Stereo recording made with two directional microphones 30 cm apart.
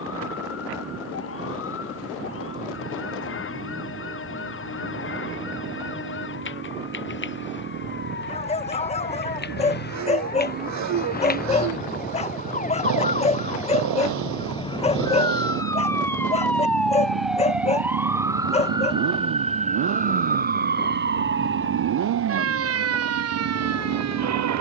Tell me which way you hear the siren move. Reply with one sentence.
In this clip you hear the siren travel towards the right.